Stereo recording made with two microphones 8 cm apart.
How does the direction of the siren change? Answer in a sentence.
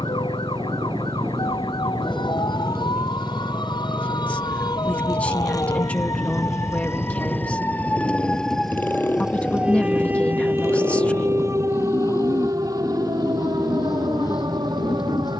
You can hear the siren travel towards the right.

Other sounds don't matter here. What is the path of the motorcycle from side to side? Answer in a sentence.
You can hear the motorcycle go from the right side to the left.